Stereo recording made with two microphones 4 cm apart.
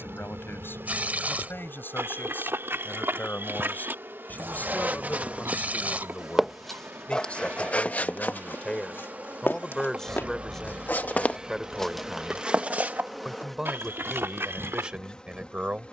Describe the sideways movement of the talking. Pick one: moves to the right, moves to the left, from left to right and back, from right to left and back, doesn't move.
moves to the right.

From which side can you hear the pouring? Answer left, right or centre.
right.